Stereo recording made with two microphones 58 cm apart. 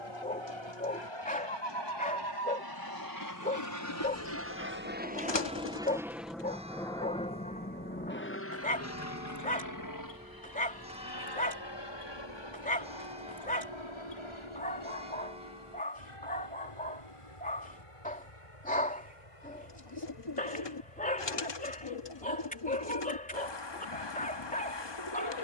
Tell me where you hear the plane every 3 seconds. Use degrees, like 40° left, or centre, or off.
50° right, 20° right, 10° left, 40° left, 50° left, 60° left, 60° left, 60° left, off.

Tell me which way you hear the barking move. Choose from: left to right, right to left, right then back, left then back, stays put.
stays put.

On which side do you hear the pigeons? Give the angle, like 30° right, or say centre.
50° left.